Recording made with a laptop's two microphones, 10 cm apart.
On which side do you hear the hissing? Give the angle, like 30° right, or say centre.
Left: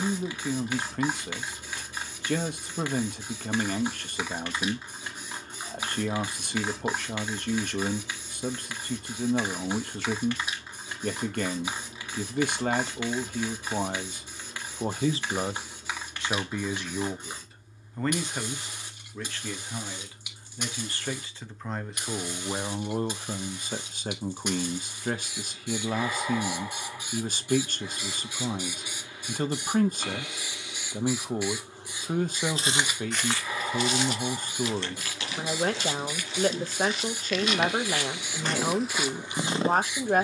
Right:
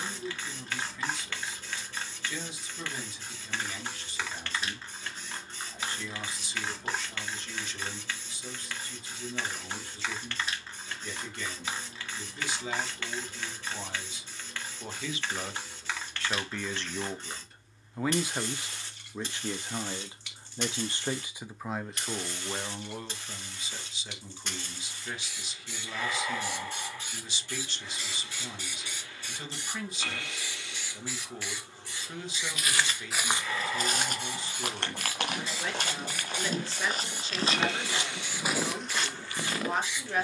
10° left.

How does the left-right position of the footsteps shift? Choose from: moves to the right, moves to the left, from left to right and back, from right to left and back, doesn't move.
from left to right and back.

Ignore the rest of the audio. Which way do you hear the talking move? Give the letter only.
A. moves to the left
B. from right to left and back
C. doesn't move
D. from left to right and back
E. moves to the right
D.